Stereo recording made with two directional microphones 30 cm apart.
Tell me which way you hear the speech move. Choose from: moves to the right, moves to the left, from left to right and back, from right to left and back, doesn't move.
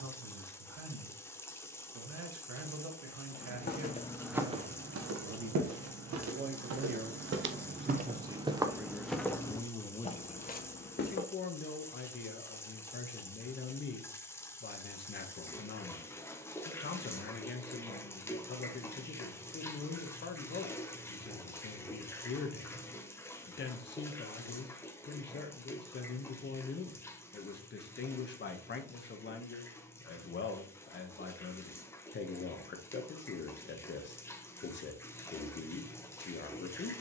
moves to the left.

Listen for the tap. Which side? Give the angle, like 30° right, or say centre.
10° left.